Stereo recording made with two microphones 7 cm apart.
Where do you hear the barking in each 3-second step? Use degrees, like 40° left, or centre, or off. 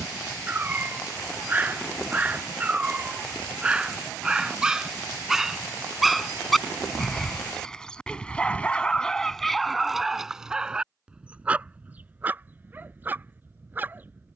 20° right, 10° right, 10° left, 10° right, 20° right.